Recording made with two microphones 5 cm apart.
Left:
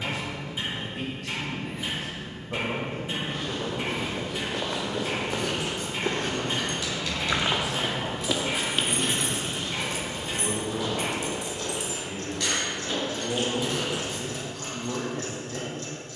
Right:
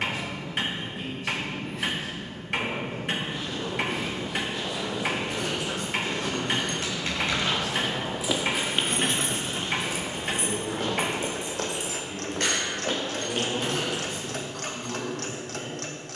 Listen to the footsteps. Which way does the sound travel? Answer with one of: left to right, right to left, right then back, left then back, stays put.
left to right.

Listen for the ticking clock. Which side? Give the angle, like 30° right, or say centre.
60° right.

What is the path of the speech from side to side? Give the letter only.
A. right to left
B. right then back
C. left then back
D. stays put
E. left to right
B.